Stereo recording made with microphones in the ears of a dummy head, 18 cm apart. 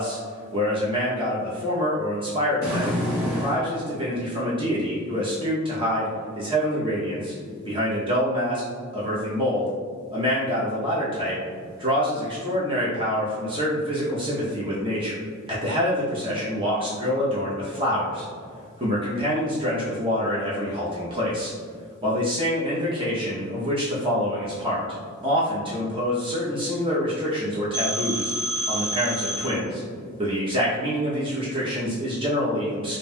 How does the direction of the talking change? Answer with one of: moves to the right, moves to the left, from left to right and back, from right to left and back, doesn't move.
doesn't move.